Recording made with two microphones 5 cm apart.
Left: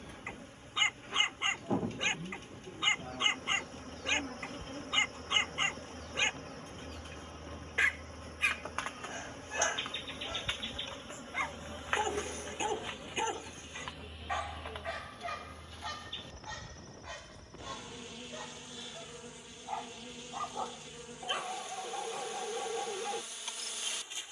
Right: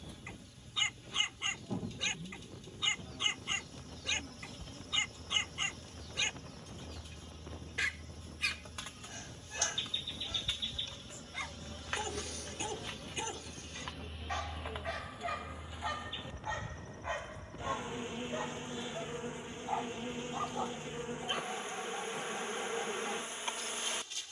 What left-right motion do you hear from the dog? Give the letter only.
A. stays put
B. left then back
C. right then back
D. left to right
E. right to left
C.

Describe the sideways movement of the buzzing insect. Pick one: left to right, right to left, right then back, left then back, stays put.
left to right.